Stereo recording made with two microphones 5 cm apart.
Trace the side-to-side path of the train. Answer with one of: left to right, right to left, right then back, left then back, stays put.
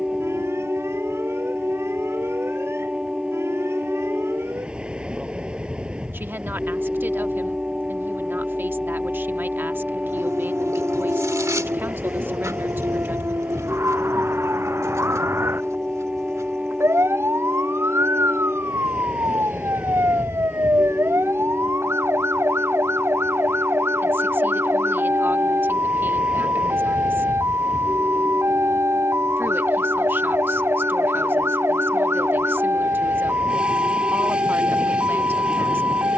stays put.